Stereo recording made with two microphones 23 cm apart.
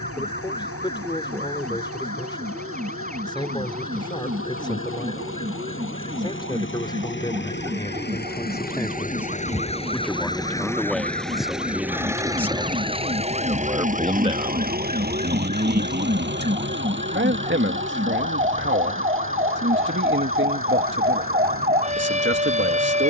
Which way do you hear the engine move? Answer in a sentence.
In this clip you hear the engine move from left to right.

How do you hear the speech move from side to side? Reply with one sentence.
You can hear the speech move to the right.